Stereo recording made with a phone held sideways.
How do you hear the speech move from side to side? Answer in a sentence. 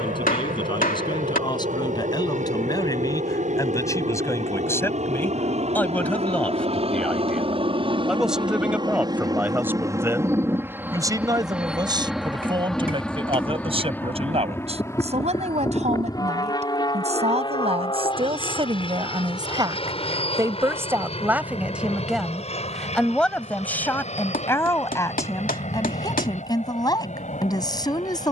In this clip you hear the speech move from left to right and back again.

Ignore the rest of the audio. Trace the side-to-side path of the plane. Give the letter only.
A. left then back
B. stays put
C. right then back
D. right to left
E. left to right
D.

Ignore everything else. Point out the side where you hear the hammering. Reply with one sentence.
In this clip you hear the hammering on the left.